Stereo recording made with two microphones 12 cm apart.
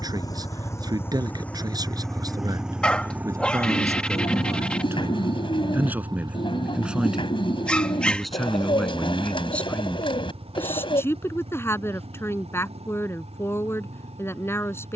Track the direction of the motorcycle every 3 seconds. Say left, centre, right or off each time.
centre, right, right, right, right.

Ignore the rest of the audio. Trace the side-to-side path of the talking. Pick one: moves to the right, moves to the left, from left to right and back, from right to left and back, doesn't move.
moves to the left.